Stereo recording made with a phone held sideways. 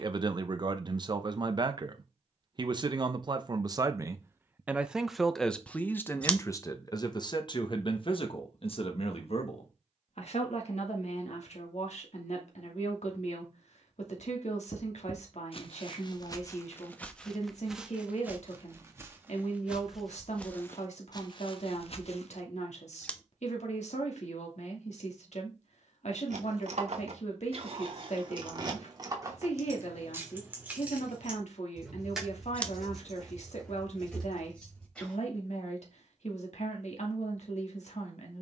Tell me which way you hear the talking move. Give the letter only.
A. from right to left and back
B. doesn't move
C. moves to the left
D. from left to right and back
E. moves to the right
C.